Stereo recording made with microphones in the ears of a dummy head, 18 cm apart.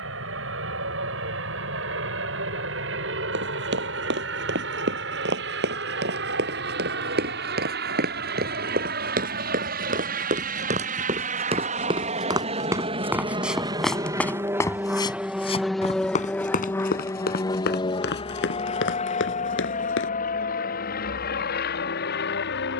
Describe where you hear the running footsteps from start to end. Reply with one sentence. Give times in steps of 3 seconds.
You can hear the running footsteps not at all from 0 s, on the right from 3 s, in the centre from 12 s, on the left from 15 s and not at all from 21 s.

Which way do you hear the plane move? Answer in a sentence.
You can hear the plane move from right to left.